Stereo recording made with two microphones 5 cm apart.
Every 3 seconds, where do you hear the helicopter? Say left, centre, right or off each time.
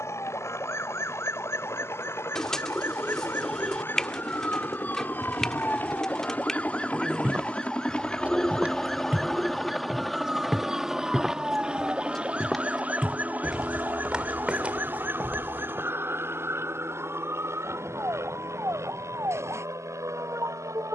left, left, left, centre, right, right, right.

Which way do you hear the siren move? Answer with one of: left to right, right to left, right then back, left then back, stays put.
left to right.